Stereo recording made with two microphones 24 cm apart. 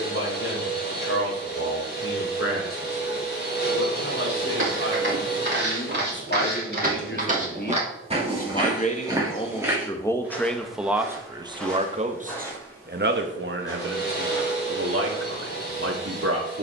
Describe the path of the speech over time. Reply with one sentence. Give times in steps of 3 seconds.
You can hear the speech on the left from 0 s, in the centre from 9 s and on the right from 12 s.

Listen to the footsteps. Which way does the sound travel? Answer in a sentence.
In this clip you hear the footsteps go from the right side to the left.